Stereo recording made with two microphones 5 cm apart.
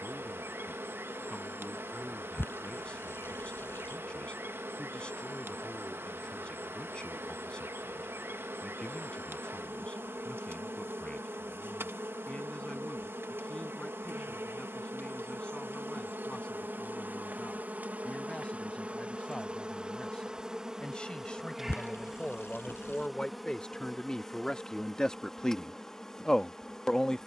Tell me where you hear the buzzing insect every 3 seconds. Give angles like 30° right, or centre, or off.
60° right, 60° right, 60° right, 60° right, 60° right, 50° right, 20° right, centre, 10° left.